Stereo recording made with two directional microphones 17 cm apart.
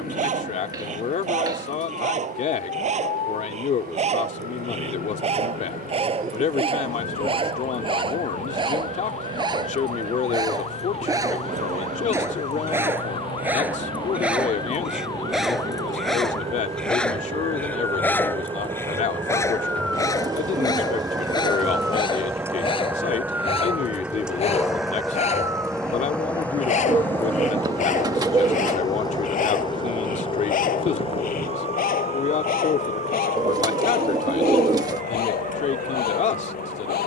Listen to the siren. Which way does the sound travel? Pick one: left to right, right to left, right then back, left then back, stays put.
left to right.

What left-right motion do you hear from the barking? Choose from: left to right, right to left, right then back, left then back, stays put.
right to left.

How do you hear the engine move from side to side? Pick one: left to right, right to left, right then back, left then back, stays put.
right to left.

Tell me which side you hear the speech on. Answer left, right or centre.
left.